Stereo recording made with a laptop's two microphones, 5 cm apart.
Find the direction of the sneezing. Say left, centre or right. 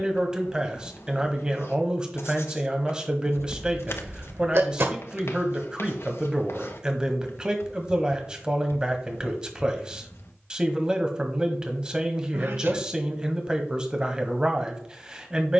right.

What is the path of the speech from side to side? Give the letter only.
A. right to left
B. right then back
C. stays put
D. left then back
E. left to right
C.